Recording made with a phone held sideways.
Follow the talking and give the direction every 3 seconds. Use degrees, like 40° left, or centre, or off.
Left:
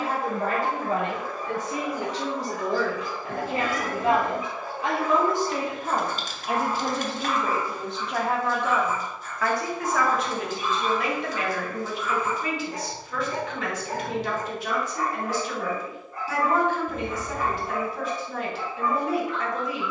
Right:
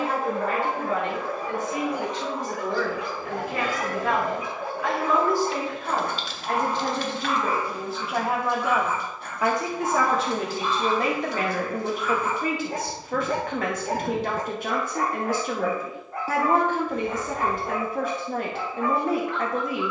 40° left, 30° left, centre, 30° right, 50° right, 50° right, 50° right.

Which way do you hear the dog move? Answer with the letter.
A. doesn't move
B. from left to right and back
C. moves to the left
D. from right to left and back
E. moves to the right
A.